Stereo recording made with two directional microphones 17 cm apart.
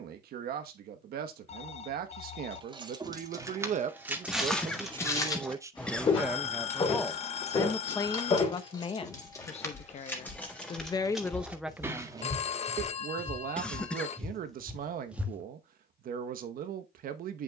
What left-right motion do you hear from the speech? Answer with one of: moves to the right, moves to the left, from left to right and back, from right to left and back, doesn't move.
from right to left and back.